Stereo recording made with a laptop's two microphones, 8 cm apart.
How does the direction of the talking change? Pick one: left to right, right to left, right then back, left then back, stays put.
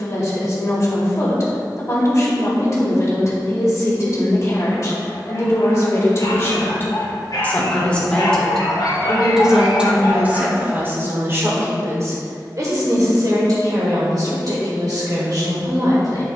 left to right.